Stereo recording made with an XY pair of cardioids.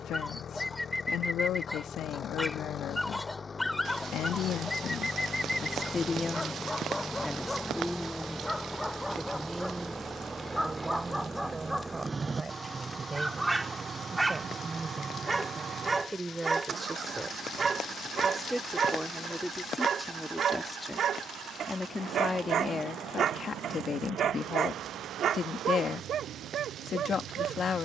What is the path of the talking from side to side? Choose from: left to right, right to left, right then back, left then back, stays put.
right then back.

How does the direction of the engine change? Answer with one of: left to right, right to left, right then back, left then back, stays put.
left to right.